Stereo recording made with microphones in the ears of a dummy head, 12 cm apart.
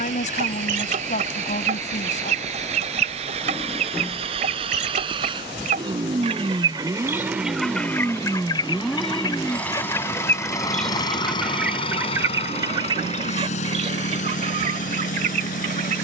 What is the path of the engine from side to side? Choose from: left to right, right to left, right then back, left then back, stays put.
right to left.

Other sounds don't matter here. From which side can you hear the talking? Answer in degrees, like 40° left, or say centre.
60° left.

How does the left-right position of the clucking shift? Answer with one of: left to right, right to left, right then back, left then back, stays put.
left then back.